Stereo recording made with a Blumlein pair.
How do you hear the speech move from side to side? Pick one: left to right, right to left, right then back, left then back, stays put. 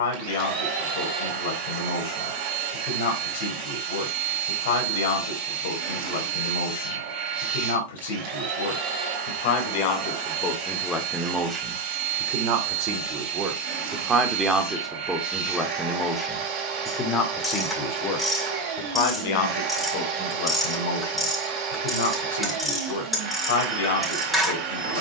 right then back.